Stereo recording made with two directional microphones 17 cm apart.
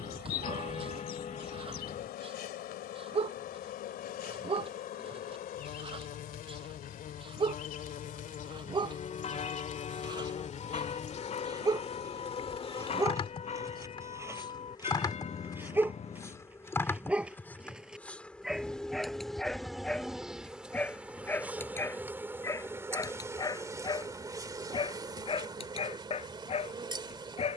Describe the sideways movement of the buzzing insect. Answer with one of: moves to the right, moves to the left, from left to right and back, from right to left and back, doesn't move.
moves to the right.